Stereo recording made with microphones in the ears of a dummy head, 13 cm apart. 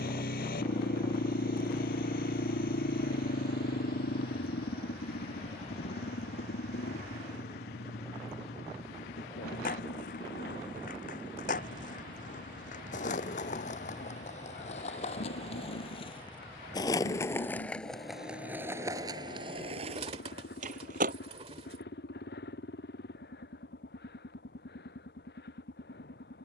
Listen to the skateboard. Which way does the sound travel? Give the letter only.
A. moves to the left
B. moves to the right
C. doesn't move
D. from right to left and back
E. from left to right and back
B.